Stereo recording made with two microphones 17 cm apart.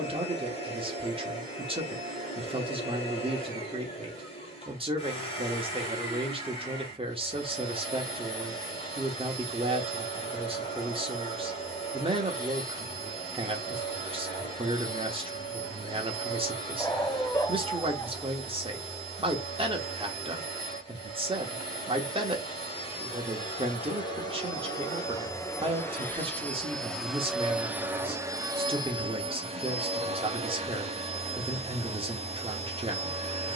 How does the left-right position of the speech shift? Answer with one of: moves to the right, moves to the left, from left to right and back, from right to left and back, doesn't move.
doesn't move.